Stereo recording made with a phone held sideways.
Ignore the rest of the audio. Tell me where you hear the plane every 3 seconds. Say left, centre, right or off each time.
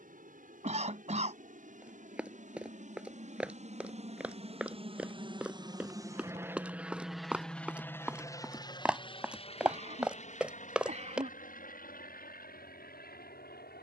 right, right, centre, left, left.